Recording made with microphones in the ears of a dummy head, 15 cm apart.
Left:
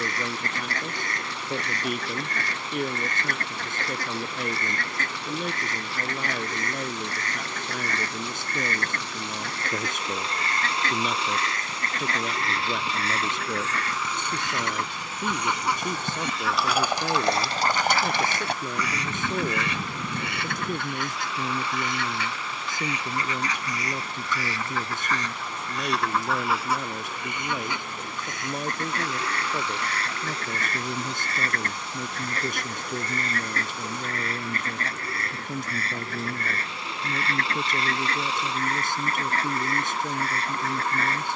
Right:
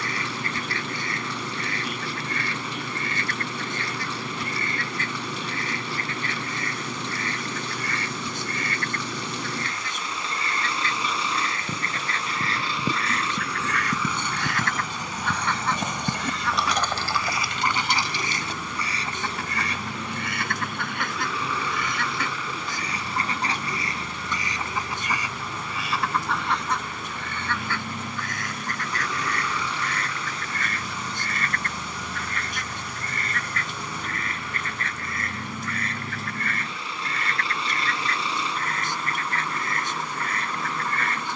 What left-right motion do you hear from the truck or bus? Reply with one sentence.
You can hear the truck or bus stay in one place.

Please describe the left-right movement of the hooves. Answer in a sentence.
You can hear the hooves travel towards the left.